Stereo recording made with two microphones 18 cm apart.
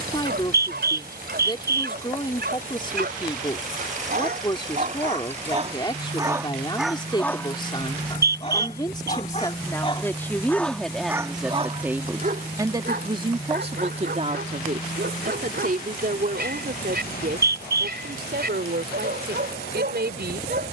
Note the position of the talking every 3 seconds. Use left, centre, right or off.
left, left, left, centre, right, right, right.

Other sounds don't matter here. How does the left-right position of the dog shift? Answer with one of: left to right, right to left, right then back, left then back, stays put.
left then back.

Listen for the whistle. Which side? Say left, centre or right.
right.